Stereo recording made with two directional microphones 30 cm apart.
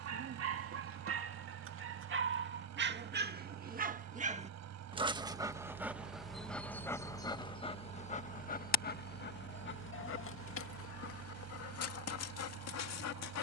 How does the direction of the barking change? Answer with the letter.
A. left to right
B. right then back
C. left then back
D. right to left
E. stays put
D.